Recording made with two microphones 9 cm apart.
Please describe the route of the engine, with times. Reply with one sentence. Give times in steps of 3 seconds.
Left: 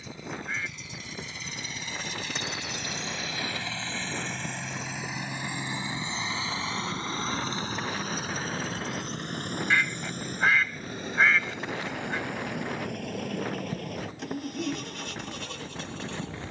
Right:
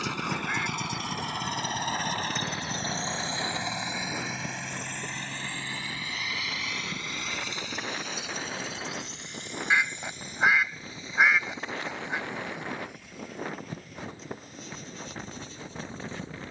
You can hear the engine on the right from 0 s, in the centre from 3 s and on the left from 6 s.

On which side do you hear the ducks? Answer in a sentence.
You can hear the ducks in the centre.